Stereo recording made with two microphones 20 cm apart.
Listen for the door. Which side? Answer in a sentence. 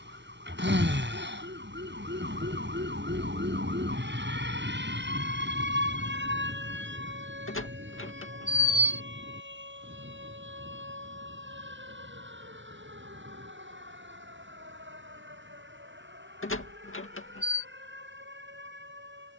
You can hear the door on the left.